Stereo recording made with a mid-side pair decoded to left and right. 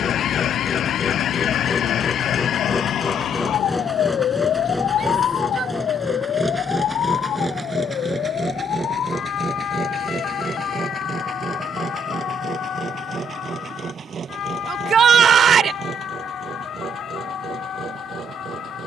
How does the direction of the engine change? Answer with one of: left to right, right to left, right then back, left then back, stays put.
left to right.